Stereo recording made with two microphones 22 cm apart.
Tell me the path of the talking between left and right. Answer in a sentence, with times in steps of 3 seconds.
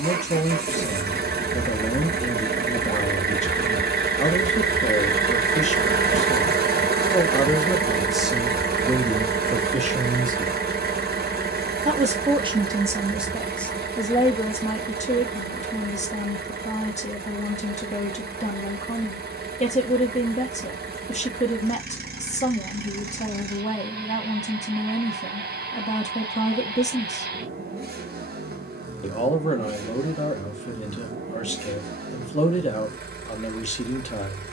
In this clip you hear the talking on the left from 0 s, in the centre from 6 s, on the right from 9 s, in the centre from 12 s and on the left from 15 s.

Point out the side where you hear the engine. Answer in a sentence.
You can hear the engine on the right.